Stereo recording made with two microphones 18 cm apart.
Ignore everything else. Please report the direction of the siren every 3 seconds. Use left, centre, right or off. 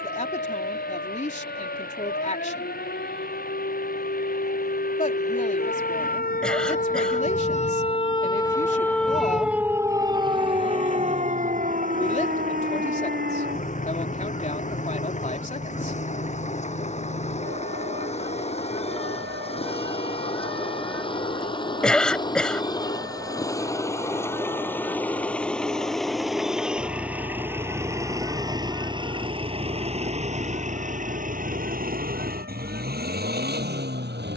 left, left, left, right, right, right, right, right, right, right, right, right.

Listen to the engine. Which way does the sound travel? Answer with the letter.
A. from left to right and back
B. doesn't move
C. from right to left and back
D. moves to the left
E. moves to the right
E.